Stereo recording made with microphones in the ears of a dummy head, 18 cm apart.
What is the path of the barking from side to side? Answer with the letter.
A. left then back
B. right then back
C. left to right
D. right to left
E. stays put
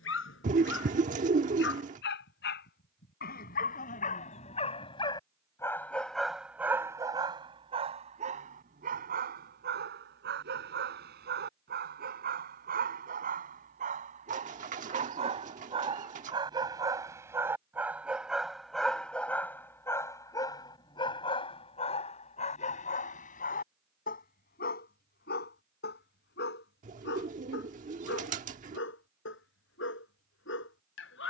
B.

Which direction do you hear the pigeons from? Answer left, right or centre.
right.